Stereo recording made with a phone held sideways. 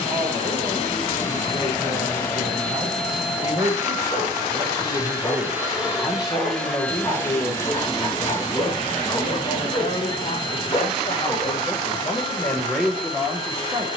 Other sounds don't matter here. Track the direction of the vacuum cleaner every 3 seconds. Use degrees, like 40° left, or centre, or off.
20° left, 10° right, 20° left, 30° left, 30° left.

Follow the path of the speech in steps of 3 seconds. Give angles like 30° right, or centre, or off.
20° right, 20° right, 20° left, 40° left, centre.